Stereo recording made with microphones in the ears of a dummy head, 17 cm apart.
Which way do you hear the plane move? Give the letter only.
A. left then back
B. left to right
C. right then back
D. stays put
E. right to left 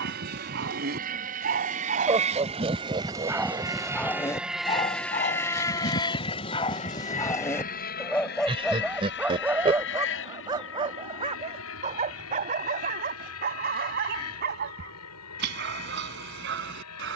E.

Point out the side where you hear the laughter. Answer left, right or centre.
right.